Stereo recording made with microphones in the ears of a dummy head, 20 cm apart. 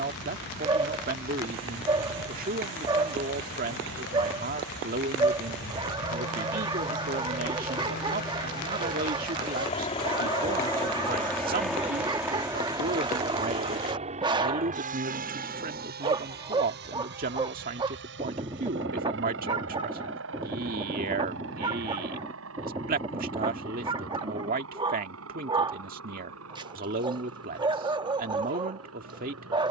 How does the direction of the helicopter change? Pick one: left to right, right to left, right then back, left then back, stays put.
left to right.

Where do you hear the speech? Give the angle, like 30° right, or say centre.
40° right.